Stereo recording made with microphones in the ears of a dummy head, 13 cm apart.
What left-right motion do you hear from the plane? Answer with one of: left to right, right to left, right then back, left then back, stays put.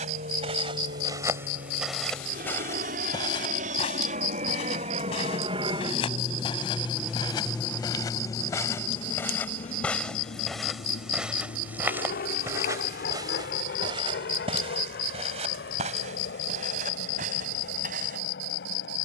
right to left.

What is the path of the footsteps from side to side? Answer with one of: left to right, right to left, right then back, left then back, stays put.
left then back.